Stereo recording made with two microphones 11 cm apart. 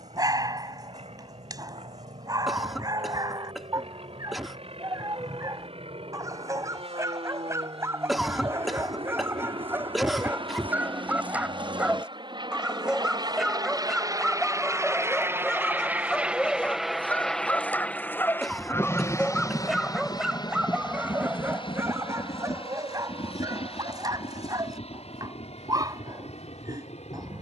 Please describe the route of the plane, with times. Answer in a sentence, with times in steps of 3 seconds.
In this clip you hear the plane on the right from 0 s, in the centre from 15 s and on the left from 18 s.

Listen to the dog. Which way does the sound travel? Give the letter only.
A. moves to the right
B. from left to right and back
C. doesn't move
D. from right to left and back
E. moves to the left
D.